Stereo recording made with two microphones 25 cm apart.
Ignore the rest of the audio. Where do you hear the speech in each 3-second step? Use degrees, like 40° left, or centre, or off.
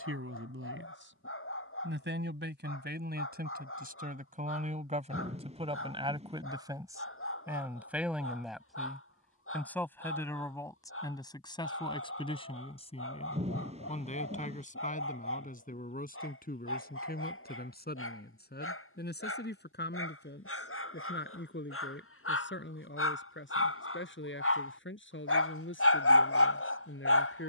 50° right, 30° right, 10° right, 10° left, 30° left, 40° left, 40° left, 50° left, 50° left.